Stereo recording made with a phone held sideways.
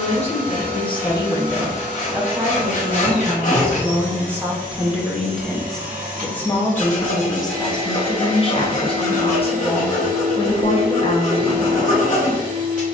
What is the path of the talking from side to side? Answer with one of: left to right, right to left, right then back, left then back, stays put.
right then back.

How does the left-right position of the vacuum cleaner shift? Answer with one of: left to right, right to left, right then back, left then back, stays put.
stays put.